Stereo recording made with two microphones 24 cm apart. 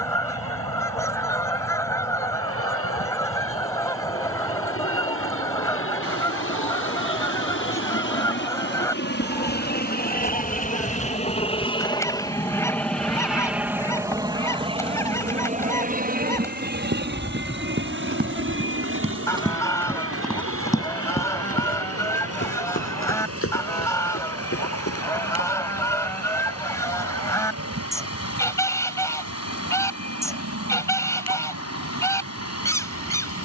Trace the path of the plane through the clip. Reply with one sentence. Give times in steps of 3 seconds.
You can hear the plane on the left from 0 s, in the centre from 12 s and on the right from 15 s.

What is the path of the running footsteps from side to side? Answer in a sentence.
In this clip you hear the running footsteps travel towards the left.